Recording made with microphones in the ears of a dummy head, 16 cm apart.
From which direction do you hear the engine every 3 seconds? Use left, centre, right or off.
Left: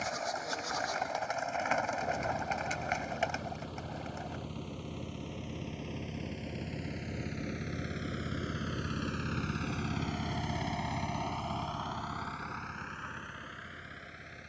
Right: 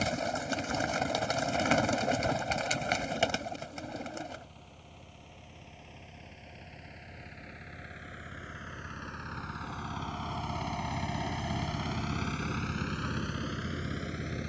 left, left, left, centre, right.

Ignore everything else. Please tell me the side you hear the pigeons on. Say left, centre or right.
right.